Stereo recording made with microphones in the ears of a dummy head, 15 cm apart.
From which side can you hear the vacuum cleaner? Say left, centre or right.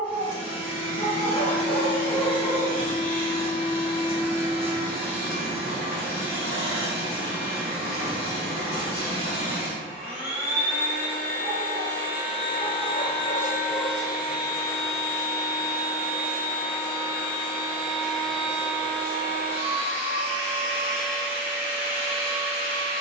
left.